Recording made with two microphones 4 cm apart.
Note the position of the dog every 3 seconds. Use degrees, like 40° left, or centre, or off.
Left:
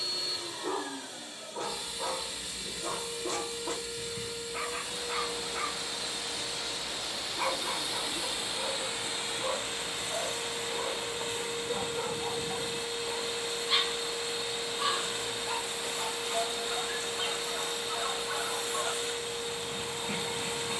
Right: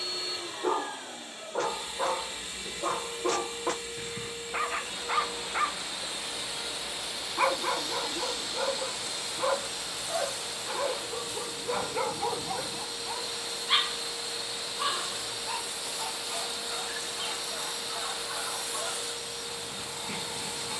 80° right, 80° right, 80° right, 80° right, 40° right, centre, 10° left.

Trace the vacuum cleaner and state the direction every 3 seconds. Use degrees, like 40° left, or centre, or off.
30° right, 30° right, centre, 30° left, 30° left, 30° left, 30° left.